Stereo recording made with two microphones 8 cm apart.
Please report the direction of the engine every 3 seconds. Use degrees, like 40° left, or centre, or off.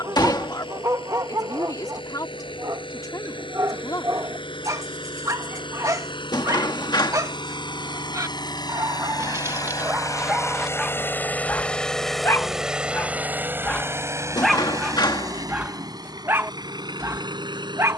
80° left, 80° left, 60° left, 30° left, 20° right, 50° right.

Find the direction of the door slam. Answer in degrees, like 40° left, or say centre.
60° left.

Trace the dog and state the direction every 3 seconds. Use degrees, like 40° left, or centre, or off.
40° right, 40° right, 40° right, 10° right, 20° left, 30° right.